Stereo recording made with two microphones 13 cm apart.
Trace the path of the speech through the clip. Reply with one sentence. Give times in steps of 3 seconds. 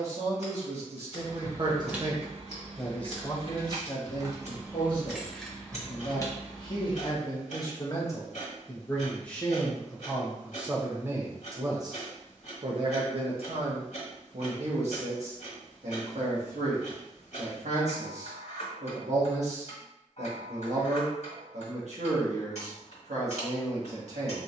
In this clip you hear the speech on the right from 0 s, on the left from 3 s, in the centre from 9 s and on the right from 12 s.